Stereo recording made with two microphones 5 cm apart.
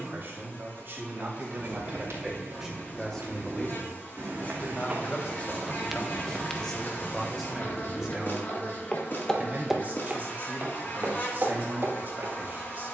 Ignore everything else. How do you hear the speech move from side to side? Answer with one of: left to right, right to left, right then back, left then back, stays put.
left then back.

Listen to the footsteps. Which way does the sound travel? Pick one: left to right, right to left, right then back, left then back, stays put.
left then back.